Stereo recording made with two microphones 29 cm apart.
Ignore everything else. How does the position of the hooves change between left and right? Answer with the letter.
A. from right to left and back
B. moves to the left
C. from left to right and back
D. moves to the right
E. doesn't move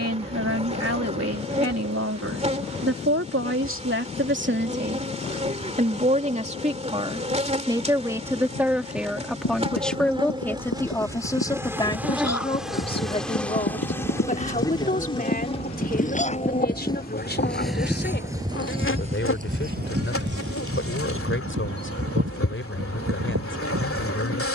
D.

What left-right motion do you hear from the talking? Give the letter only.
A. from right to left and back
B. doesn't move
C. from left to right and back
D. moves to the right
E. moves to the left
E.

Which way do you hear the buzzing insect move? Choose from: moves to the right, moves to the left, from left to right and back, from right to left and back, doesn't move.
moves to the left.